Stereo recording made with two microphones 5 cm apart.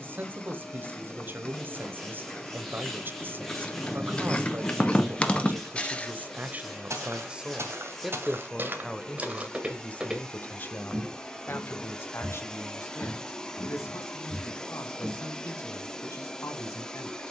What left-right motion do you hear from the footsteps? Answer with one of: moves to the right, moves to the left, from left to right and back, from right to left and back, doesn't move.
moves to the left.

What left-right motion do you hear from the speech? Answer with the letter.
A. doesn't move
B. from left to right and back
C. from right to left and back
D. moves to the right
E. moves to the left
E.